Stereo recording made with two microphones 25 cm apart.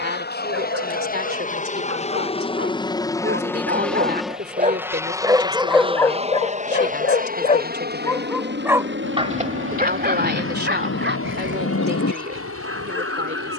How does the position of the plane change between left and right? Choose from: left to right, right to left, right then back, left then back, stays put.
left to right.